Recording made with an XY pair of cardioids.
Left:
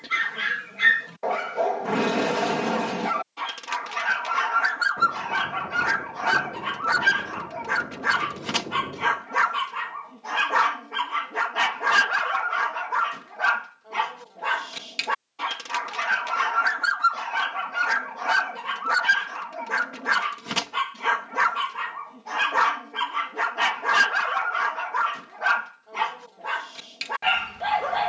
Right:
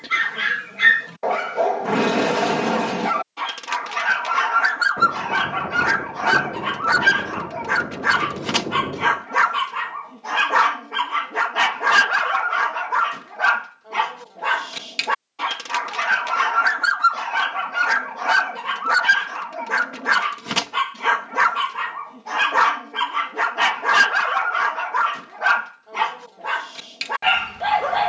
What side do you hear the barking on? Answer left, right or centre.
right.